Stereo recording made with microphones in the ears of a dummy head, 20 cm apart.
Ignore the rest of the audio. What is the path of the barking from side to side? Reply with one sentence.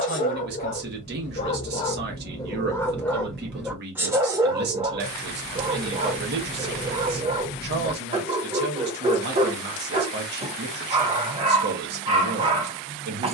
You can hear the barking travel towards the right.